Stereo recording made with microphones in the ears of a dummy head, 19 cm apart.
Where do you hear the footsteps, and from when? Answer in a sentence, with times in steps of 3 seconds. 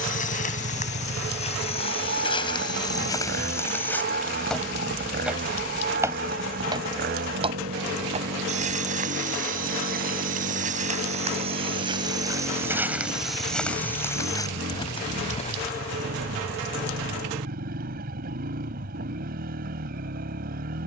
You can hear the footsteps on the left from 0 s, in the centre from 3 s, on the right from 6 s, in the centre from 12 s, on the left from 15 s and not at all from 18 s.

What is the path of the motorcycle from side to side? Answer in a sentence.
You can hear the motorcycle stay put.